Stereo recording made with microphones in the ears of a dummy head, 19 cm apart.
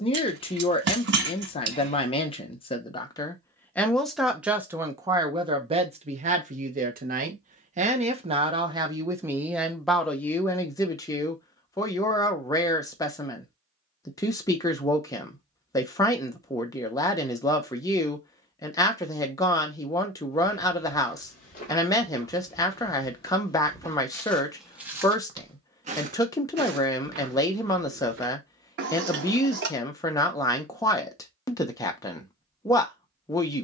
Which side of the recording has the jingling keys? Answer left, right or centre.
right.